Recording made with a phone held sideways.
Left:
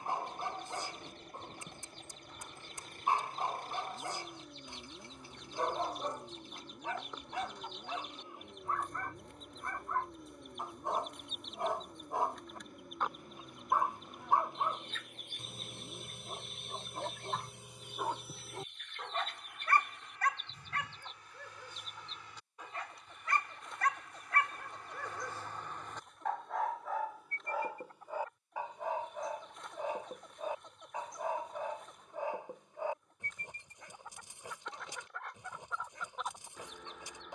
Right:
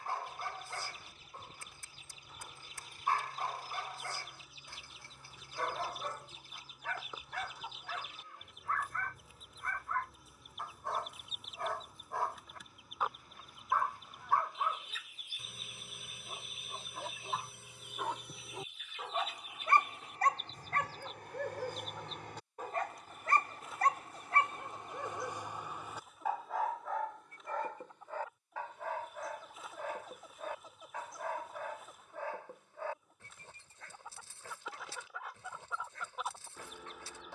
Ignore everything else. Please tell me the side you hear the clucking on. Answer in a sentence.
You can hear the clucking in the centre.